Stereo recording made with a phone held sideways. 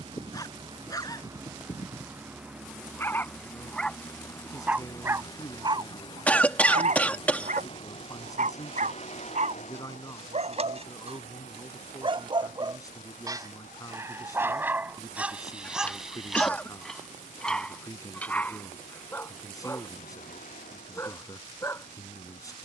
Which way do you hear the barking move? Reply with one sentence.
In this clip you hear the barking move from left to right and back again.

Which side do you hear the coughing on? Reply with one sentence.
In this clip you hear the coughing in the centre.